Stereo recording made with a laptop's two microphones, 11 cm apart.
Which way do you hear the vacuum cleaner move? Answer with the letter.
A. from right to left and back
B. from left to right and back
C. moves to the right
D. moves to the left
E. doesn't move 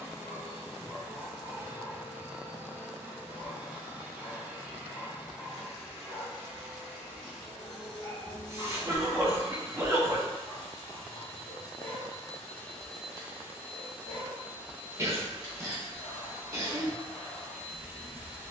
A.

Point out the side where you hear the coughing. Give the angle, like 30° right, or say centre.
30° right.